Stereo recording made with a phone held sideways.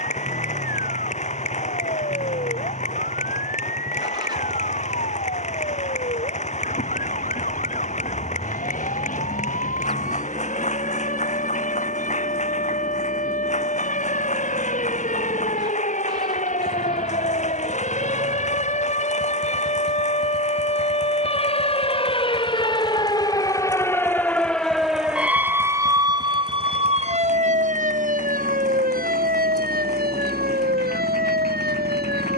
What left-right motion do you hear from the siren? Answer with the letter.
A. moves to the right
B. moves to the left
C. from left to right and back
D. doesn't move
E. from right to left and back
A.